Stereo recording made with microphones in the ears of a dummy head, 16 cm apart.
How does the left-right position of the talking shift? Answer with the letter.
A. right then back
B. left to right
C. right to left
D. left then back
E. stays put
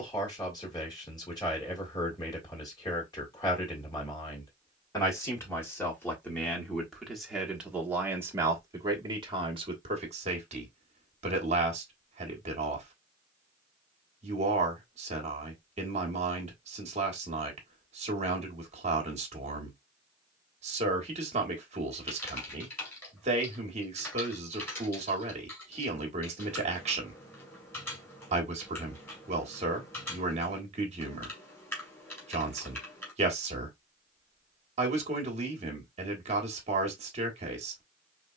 B.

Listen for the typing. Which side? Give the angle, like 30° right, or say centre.
10° left.